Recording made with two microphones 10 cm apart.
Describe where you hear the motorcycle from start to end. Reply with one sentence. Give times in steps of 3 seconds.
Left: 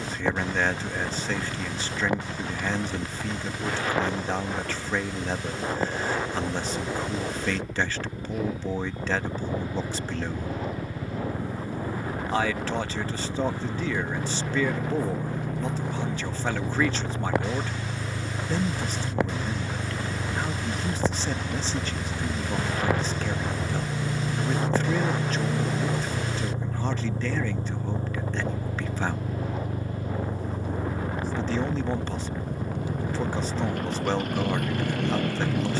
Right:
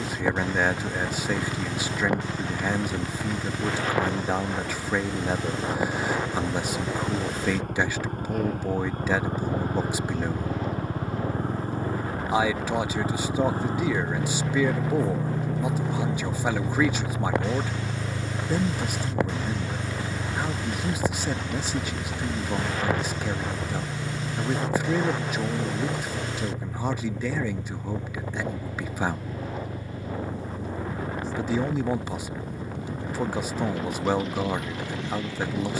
In this clip you hear the motorcycle on the right from 0 s, in the centre from 18 s and on the left from 24 s.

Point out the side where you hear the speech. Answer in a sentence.
You can hear the speech in the centre.